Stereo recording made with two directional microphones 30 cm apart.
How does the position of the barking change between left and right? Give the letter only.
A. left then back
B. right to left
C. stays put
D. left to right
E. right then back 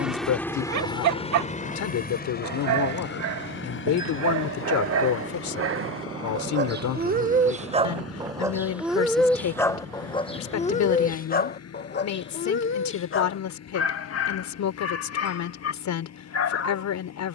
B.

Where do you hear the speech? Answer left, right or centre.
left.